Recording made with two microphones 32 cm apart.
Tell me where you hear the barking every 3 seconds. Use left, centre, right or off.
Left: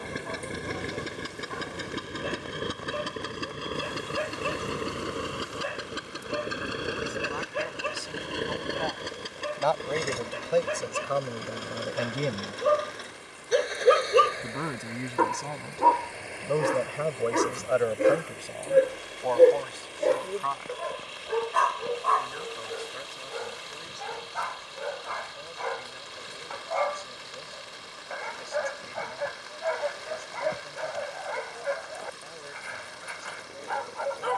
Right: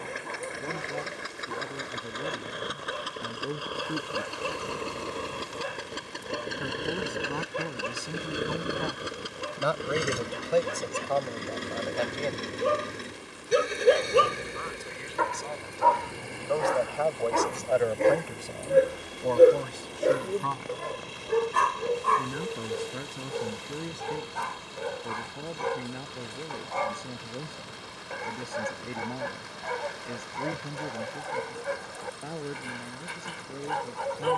right, right, right, right, centre, left, centre, right, right, right, right, right.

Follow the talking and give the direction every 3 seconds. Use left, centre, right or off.
right, right, right, centre, left, left, right, right, right, right, right, right.